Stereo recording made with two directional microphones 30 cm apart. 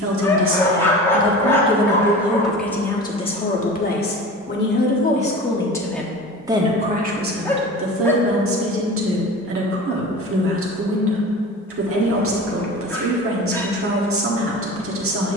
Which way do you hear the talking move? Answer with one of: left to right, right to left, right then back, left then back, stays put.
left then back.